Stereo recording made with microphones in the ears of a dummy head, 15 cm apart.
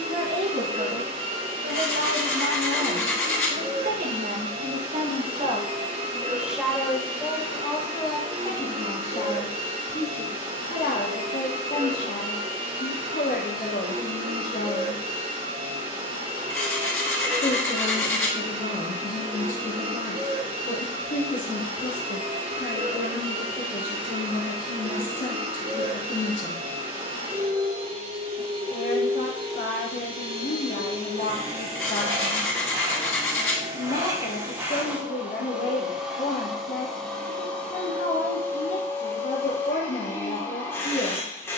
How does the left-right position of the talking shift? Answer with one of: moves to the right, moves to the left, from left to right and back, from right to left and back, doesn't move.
moves to the left.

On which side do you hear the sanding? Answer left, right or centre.
centre.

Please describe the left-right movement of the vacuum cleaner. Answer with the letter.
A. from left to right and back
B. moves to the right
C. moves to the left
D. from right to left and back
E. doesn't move
C.